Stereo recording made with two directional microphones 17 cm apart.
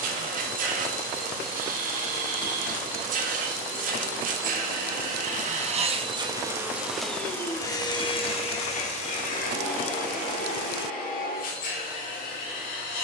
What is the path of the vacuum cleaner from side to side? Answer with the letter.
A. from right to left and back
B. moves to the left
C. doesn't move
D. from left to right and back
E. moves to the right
B.